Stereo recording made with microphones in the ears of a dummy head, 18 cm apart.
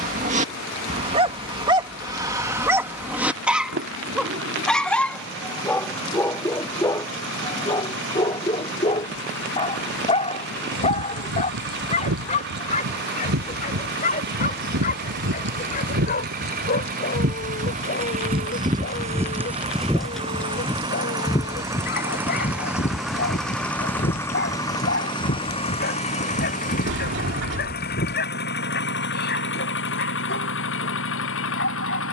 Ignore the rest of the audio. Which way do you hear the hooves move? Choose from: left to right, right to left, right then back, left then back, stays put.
right to left.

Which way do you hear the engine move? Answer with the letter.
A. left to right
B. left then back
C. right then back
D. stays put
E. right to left
E.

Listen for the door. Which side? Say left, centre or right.
right.